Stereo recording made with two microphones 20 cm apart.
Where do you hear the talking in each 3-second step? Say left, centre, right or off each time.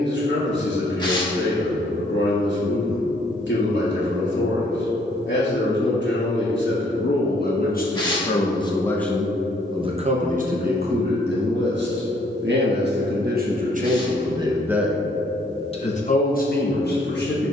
left, left, left, right, right, left.